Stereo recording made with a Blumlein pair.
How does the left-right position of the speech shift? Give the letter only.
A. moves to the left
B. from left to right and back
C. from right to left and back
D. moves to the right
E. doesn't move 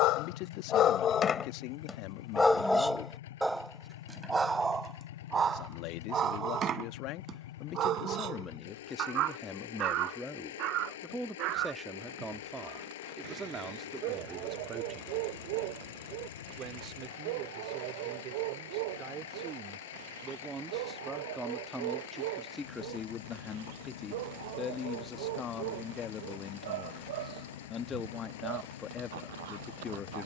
B.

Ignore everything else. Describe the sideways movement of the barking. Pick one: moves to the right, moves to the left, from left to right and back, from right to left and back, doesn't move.
moves to the right.